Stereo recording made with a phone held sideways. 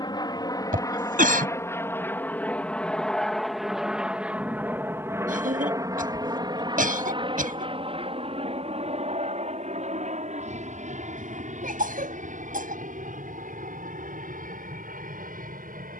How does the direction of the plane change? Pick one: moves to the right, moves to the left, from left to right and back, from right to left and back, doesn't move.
moves to the right.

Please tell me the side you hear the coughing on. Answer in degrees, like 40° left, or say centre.
90° right.